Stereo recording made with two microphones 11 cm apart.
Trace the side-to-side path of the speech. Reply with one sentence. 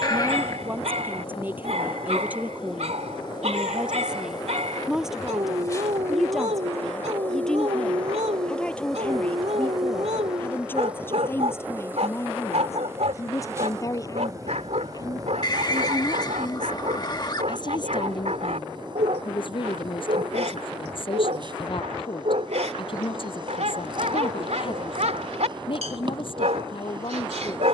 In this clip you hear the speech move from right to left.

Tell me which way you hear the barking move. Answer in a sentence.
You can hear the barking stay put.